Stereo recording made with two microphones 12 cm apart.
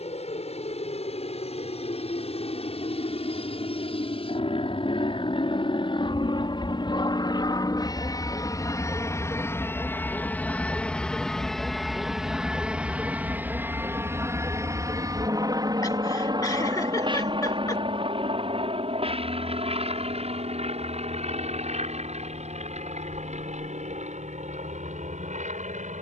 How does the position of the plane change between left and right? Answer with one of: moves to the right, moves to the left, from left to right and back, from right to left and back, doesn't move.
moves to the right.